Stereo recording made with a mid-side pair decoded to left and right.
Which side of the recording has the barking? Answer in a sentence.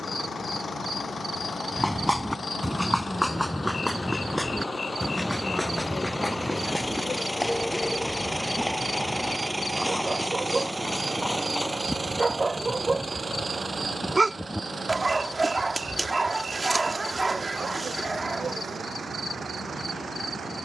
In this clip you hear the barking on the right.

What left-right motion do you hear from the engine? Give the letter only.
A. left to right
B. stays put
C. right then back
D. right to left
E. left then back
A.